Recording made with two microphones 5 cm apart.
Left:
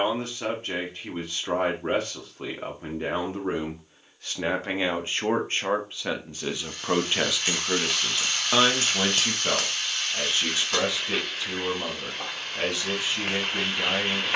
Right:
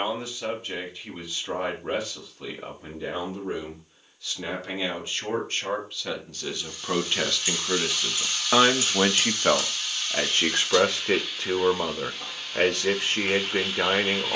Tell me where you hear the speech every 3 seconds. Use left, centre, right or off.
left, left, centre, right, right.